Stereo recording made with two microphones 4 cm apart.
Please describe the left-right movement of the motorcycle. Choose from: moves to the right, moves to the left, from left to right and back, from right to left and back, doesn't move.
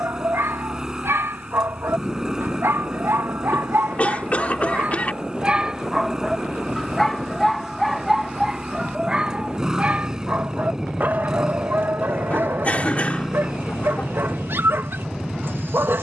doesn't move.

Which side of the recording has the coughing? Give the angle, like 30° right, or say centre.
30° left.